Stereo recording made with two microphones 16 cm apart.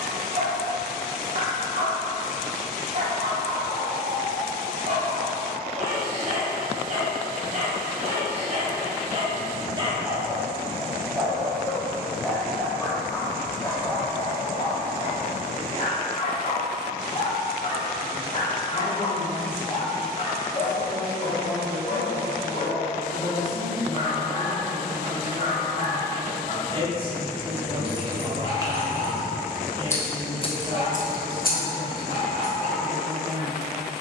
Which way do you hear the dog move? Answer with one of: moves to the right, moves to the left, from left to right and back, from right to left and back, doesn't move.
moves to the left.